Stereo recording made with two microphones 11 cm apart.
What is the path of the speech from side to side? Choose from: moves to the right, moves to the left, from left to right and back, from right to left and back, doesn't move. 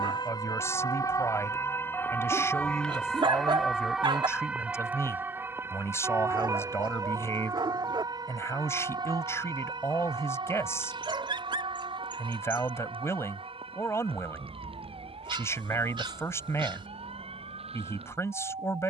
doesn't move.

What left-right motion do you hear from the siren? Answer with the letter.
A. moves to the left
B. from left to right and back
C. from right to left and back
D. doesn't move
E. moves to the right
E.